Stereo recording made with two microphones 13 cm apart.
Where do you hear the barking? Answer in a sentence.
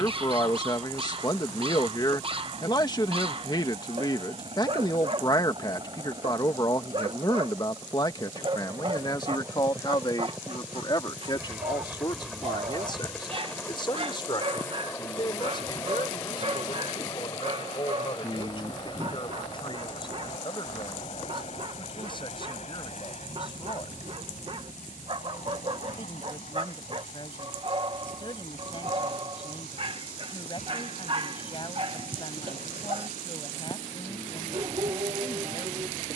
You can hear the barking on the right.